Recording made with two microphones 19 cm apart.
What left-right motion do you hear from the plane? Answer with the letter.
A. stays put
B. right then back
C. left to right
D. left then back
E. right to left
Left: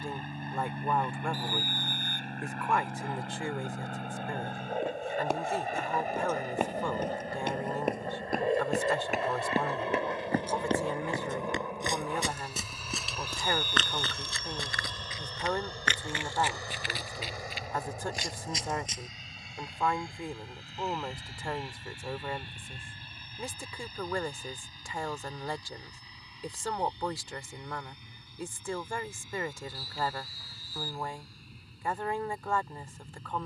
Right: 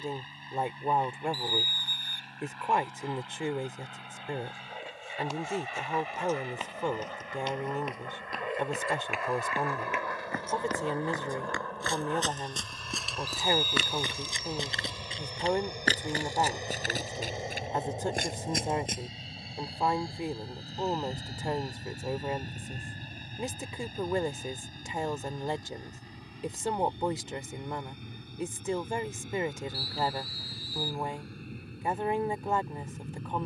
C.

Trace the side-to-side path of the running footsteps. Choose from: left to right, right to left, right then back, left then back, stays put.
left to right.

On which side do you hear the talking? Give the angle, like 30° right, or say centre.
20° right.